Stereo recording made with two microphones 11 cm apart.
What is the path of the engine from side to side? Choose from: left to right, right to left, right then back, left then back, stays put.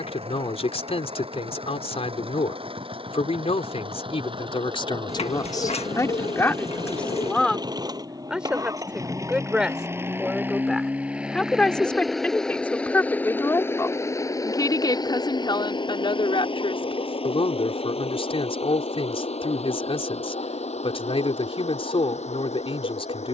right to left.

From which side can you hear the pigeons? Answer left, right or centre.
left.